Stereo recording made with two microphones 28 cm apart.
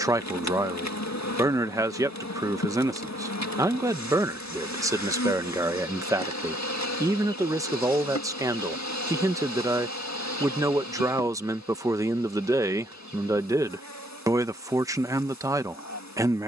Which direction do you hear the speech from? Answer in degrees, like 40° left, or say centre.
10° right.